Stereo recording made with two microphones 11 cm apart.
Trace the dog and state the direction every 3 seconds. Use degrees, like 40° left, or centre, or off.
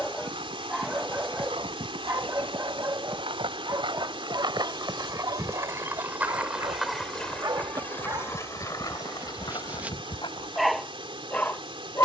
20° right, 40° right, 30° right, 10° right.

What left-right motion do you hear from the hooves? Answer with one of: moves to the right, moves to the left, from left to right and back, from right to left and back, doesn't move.
moves to the left.